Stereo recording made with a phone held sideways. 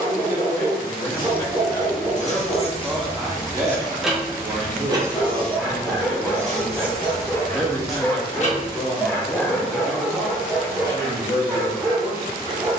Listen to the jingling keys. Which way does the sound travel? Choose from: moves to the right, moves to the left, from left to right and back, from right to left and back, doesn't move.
from left to right and back.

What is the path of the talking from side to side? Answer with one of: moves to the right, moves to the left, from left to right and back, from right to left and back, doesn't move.
from left to right and back.